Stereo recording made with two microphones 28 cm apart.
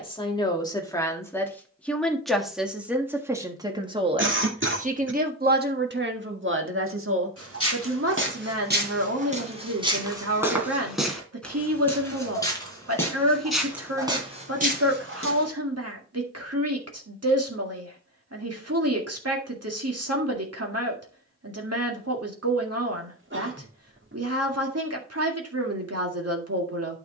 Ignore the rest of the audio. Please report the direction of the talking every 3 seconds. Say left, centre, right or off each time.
centre, right, right, right, right, right, right, right, right.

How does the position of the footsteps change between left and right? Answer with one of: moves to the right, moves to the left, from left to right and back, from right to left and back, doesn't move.
from right to left and back.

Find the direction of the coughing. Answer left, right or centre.
right.